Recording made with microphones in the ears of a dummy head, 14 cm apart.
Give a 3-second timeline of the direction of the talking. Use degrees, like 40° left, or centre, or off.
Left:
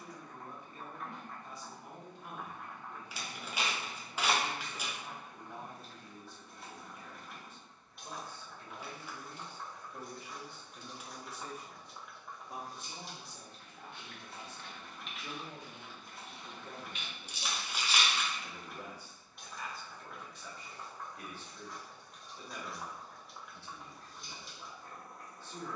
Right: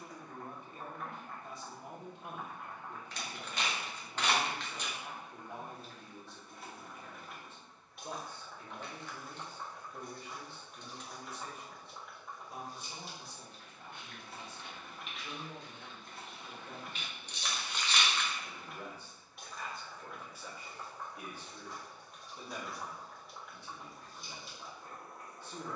20° right, 20° right, 20° right, 20° left, 50° left, 40° left, centre, 20° right, 20° right.